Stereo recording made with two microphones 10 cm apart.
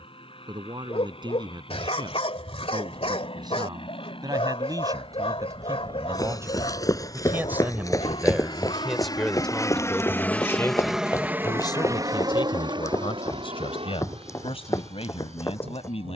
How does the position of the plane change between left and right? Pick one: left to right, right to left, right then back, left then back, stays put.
left to right.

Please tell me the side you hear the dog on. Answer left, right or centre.
left.